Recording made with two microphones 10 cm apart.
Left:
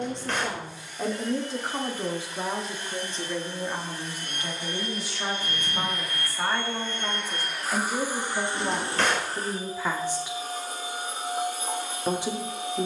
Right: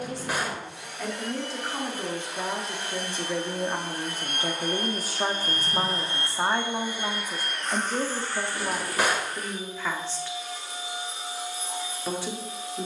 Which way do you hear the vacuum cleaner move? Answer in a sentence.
You can hear the vacuum cleaner move from right to left.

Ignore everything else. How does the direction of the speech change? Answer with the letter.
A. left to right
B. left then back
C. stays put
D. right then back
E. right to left
D.